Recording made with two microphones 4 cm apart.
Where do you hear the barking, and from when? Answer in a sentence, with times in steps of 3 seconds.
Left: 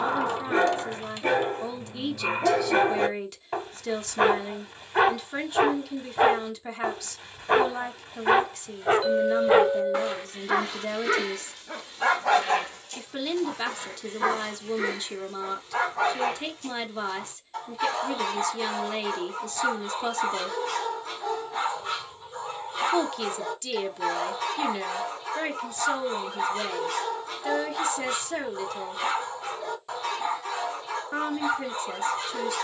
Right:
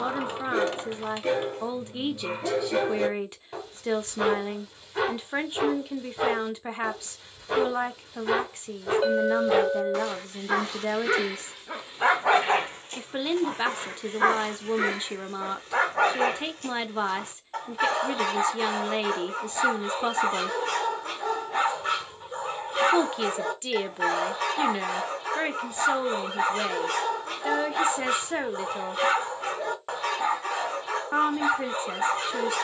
In this clip you hear the barking on the left from 0 s, in the centre from 9 s and on the right from 12 s.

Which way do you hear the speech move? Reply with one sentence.
You can hear the speech stay in one place.